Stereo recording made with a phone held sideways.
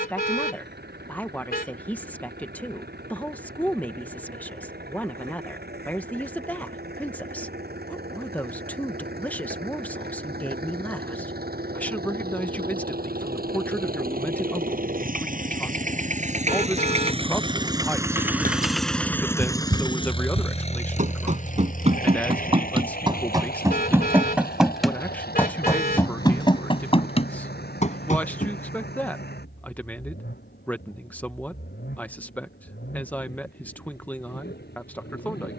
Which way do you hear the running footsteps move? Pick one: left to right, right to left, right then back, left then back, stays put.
right to left.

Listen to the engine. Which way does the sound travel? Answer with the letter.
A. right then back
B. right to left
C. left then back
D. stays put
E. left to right
B.